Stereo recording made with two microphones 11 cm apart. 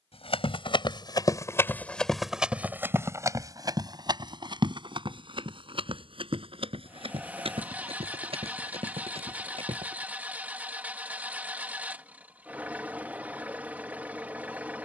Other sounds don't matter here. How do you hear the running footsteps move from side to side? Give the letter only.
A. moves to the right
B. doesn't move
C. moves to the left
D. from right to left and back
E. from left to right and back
A.